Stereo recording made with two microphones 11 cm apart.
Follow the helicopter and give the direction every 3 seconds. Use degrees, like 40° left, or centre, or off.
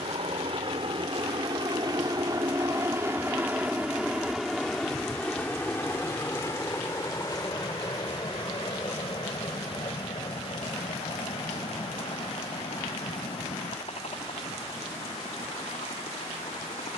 40° right, centre, 30° left, 50° left, 50° left, 60° left.